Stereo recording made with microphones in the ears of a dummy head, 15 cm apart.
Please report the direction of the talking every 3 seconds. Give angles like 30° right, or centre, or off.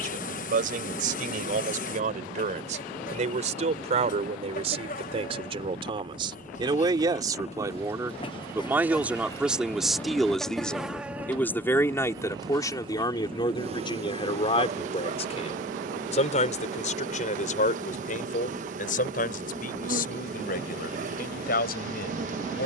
50° right, 40° right, 20° right, centre, 30° left, 50° left, 60° left, 60° left.